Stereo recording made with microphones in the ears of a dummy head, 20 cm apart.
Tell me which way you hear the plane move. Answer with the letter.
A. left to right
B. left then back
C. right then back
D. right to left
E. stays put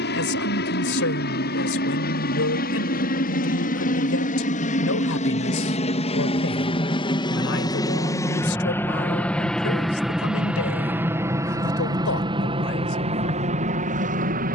A.